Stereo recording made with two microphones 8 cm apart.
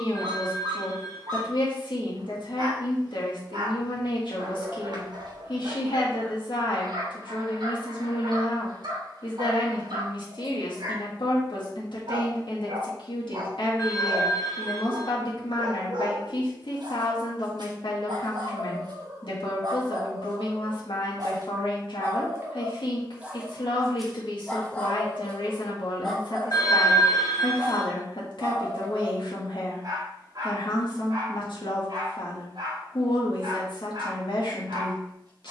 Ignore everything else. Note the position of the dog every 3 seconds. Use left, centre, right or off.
right, right, right, right, right, right, right, right, centre, right, right, right.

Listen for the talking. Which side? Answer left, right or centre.
left.